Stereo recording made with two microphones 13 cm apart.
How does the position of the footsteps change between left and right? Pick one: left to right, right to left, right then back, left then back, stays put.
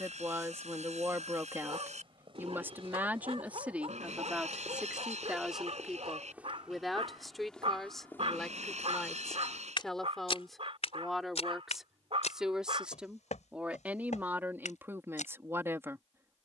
right to left.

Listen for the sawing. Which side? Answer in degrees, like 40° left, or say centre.
70° right.